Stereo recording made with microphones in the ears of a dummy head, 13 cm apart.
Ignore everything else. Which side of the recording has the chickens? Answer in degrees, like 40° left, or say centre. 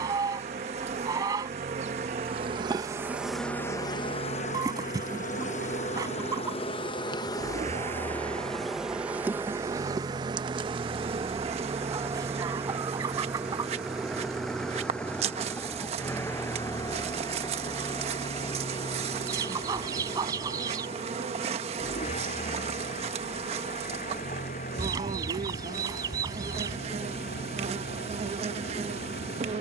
20° right.